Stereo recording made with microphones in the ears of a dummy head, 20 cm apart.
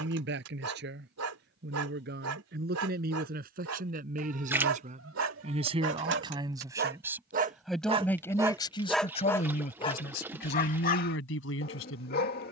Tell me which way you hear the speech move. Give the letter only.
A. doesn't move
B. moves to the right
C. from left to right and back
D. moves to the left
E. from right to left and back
D.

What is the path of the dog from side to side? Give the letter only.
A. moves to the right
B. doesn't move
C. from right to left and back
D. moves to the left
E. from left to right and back
D.